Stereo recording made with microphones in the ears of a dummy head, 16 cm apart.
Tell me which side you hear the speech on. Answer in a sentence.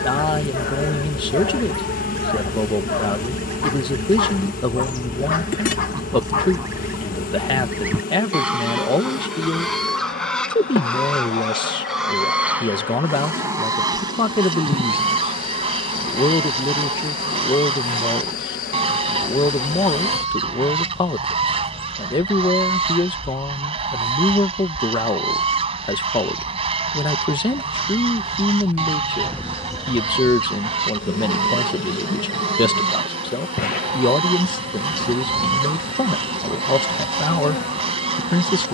You can hear the speech on the left.